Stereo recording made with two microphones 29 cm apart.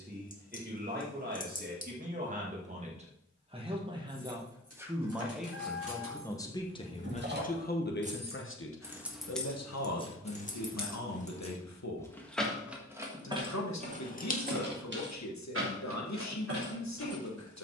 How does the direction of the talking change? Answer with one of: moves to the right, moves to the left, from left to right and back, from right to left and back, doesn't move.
moves to the left.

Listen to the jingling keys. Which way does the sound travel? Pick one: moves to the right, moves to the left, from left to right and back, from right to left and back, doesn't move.
from right to left and back.